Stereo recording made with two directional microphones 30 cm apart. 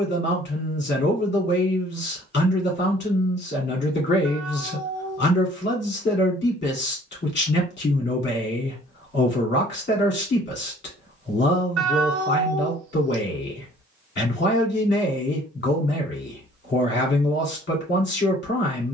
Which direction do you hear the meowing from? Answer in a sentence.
In this clip you hear the meowing on the right.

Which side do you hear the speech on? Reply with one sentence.
You can hear the speech on the left.